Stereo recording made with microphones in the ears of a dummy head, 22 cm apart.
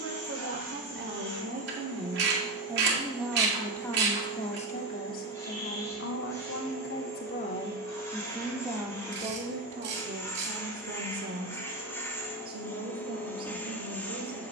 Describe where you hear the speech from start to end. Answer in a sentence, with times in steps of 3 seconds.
In this clip you hear the speech on the right from 0 s, on the left from 3 s and on the right from 9 s.